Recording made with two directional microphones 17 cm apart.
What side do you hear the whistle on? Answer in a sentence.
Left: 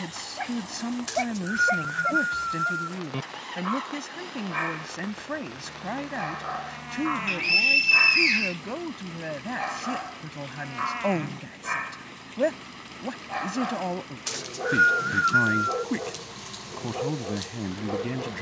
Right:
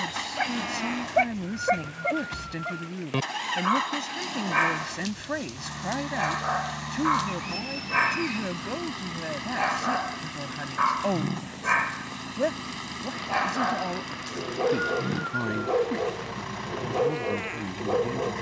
In this clip you hear the whistle on the left.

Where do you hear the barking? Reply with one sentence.
In this clip you hear the barking on the right.